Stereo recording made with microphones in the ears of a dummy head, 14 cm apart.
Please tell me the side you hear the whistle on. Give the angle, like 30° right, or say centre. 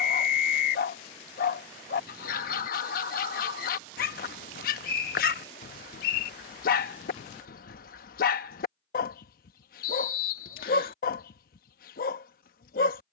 60° left.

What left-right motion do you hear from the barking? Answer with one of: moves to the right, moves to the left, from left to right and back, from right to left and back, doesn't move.
doesn't move.